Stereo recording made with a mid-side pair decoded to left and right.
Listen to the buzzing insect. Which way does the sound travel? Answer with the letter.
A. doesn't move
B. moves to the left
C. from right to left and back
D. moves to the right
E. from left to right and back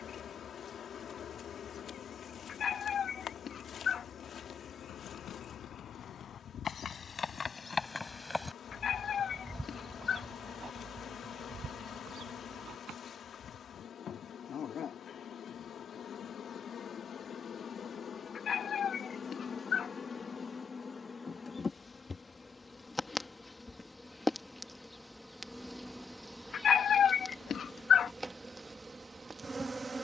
D.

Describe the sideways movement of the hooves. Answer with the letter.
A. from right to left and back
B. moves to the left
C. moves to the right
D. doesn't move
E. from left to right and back
C.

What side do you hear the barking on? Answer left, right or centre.
left.